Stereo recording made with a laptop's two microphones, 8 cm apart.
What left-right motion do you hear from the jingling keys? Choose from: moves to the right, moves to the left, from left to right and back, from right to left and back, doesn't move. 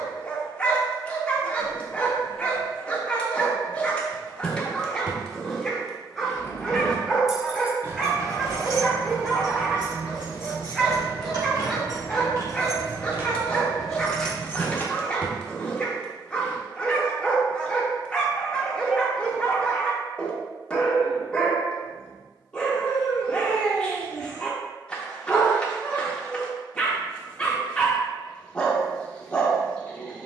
from left to right and back.